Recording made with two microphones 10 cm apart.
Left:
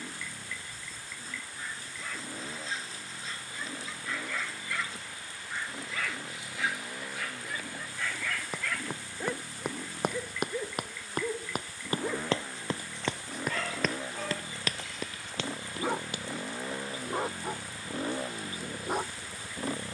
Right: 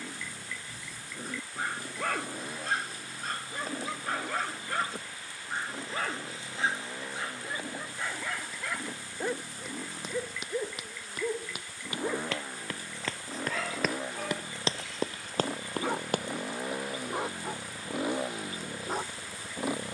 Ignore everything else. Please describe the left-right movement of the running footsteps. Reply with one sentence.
In this clip you hear the running footsteps travel towards the right.